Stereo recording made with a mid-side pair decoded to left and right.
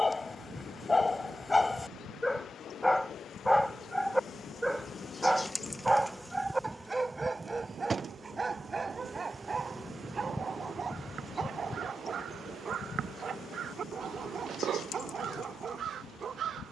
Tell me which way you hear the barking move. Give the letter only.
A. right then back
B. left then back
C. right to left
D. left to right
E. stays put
D.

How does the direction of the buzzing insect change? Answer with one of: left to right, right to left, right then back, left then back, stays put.
right then back.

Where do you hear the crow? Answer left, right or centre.
right.